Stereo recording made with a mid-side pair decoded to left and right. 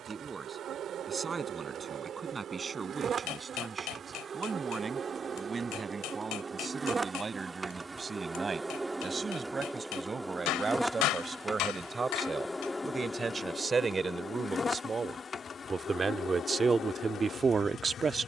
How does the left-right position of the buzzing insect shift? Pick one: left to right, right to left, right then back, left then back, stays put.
right to left.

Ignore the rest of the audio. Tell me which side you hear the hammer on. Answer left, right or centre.
left.